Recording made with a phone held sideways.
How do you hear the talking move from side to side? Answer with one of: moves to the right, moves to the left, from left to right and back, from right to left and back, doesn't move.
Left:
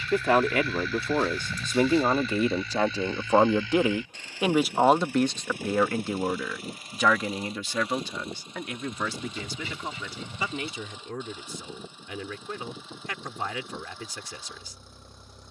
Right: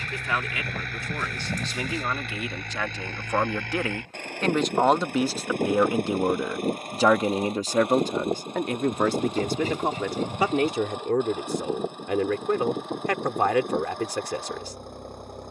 moves to the right.